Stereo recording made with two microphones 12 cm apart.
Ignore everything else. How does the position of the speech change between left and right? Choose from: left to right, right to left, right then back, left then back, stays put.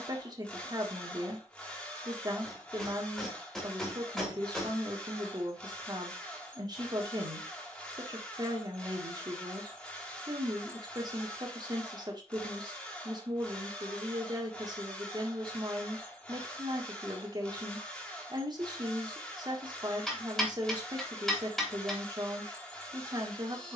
stays put.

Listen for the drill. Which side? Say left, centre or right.
centre.